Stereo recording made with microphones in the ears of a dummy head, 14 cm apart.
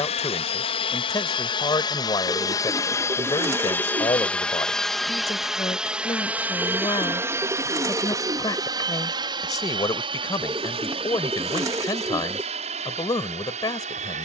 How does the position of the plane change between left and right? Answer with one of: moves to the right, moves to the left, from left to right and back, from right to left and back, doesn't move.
moves to the right.